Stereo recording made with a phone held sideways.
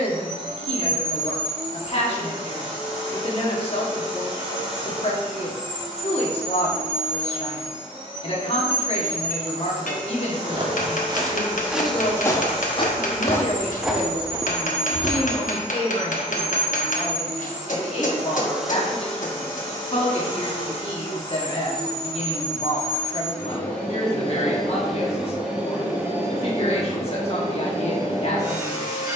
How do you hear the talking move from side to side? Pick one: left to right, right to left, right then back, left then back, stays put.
stays put.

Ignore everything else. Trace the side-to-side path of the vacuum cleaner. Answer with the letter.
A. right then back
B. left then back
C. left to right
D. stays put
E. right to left
B.